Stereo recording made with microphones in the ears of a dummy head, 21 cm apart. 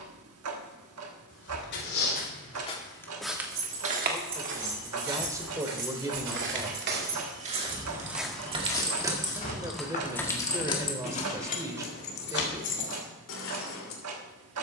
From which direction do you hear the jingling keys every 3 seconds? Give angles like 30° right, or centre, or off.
off, 60° right, 30° right, 20° left, 50° left.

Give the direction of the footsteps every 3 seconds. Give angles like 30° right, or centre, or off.
40° left, 50° right, 30° right, 40° left, off.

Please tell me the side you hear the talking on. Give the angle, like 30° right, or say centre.
10° right.